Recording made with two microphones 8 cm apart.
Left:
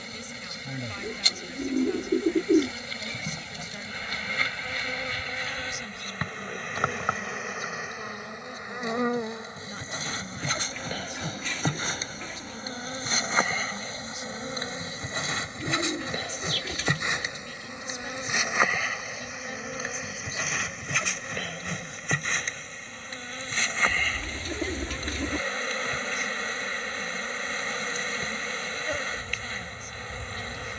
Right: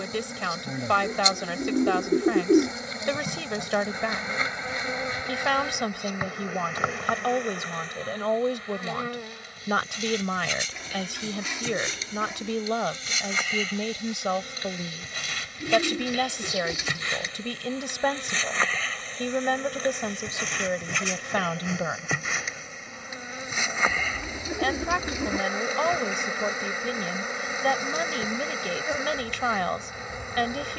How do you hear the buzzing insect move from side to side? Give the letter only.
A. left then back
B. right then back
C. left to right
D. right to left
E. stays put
A.